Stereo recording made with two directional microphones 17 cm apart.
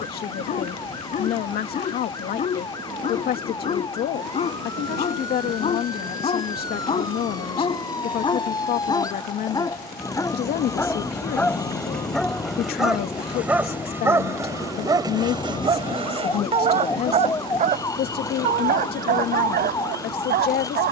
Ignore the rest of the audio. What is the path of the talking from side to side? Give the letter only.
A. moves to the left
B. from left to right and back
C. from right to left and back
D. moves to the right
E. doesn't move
E.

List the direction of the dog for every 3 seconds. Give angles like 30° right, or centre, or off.
50° left, 40° left, 30° left, 20° left, 10° right, 40° right, 60° right.